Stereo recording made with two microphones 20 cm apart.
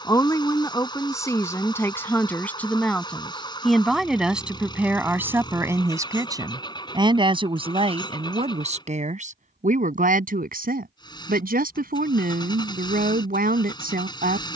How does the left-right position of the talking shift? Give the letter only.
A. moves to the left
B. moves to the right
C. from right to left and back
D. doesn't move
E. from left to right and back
B.